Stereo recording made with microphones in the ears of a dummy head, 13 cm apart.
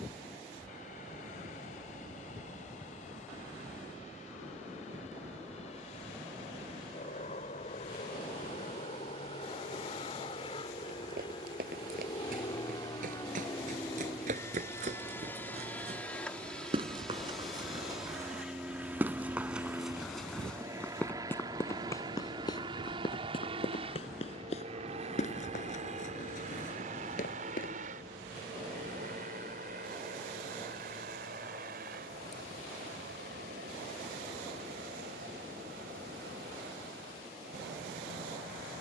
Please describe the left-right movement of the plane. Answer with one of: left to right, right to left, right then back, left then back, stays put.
left to right.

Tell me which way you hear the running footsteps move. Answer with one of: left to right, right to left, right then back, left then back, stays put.
right to left.